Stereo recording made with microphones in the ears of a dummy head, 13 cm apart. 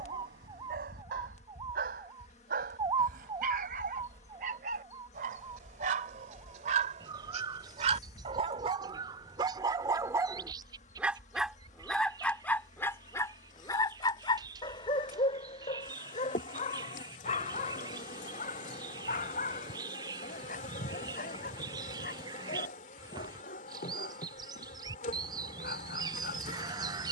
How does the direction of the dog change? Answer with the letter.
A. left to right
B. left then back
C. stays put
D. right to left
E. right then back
D.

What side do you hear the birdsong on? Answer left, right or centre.
right.